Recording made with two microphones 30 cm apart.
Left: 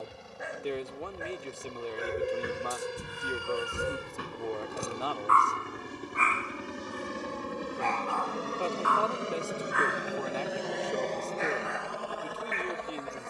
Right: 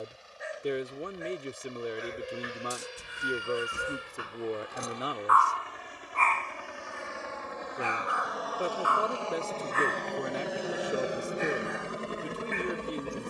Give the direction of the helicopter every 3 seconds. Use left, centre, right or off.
left, left, left, centre, right.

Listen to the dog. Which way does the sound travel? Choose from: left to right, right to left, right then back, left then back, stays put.
left to right.